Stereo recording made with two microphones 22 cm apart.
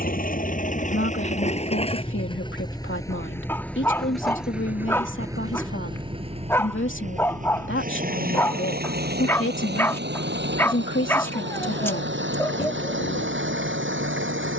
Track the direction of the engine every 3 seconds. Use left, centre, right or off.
left, centre, right, right, right.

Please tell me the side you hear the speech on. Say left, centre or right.
left.